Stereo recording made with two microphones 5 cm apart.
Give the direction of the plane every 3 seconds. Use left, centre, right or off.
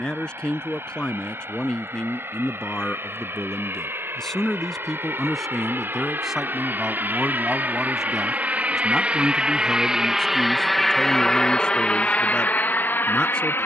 right, right, right, centre, left.